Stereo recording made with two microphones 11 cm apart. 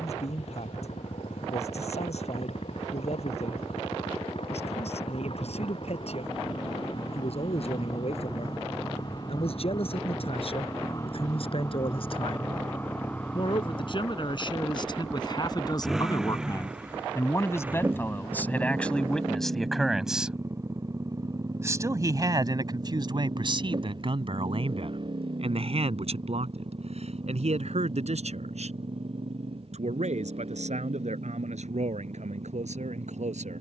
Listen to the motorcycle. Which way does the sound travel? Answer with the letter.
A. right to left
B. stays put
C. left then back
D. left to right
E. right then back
D.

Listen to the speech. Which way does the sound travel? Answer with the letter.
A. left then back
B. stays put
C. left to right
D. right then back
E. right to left
C.